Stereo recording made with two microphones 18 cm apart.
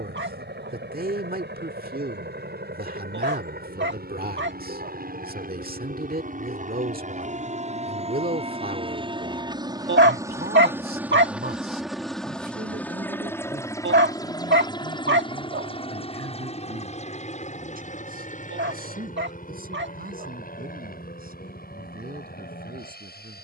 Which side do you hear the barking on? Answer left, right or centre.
right.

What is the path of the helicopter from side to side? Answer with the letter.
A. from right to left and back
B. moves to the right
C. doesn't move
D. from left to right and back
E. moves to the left
E.